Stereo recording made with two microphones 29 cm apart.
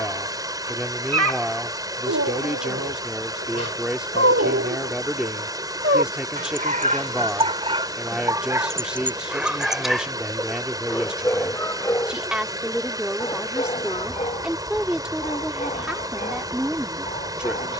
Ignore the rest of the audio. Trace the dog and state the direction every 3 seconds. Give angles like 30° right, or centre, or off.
60° right, 50° right, 20° right, centre, 20° left, 30° left.